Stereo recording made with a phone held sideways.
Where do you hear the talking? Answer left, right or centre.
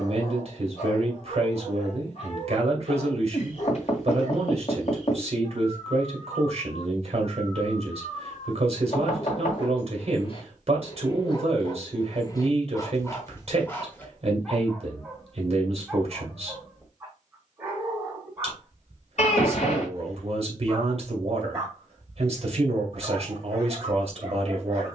right.